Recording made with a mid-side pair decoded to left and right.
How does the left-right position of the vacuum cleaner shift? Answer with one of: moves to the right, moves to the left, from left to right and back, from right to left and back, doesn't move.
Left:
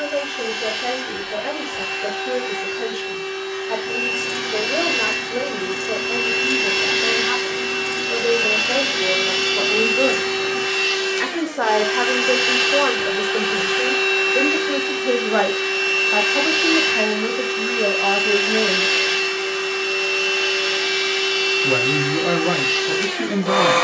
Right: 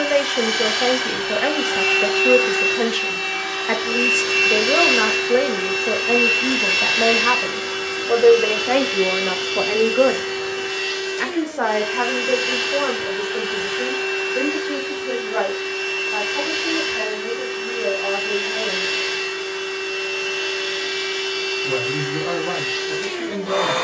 moves to the left.